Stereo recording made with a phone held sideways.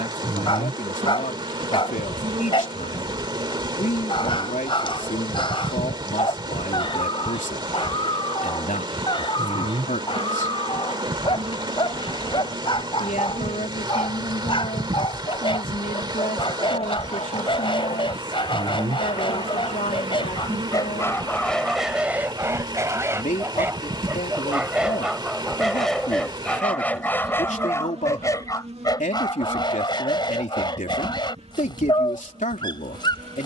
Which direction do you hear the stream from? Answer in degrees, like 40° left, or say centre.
40° right.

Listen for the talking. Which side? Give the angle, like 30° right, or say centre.
80° left.